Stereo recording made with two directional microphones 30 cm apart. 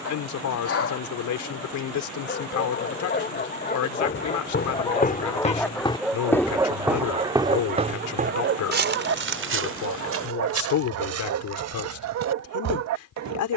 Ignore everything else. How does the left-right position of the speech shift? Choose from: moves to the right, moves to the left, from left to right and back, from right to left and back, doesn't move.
doesn't move.